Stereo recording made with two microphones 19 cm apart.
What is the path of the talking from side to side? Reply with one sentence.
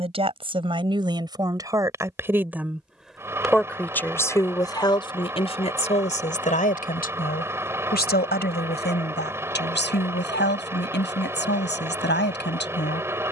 In this clip you hear the talking move to the left.